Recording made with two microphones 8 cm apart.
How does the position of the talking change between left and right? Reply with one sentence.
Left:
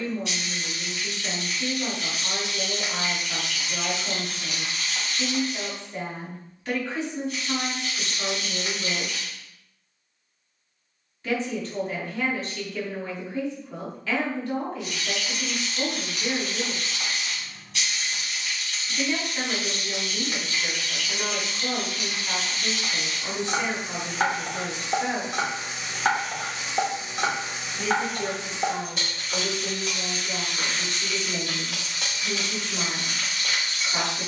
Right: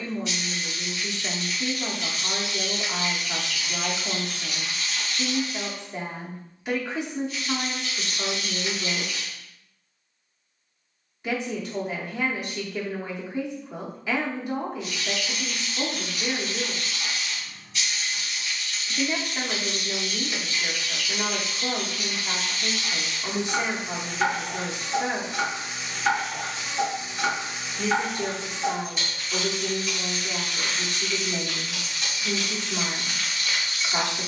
You can hear the talking stay in one place.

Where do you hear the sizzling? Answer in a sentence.
You can hear the sizzling on the left.